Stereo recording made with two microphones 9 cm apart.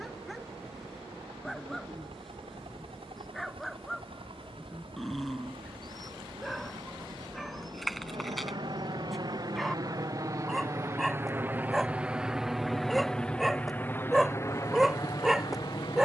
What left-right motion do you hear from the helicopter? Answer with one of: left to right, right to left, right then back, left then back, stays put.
right to left.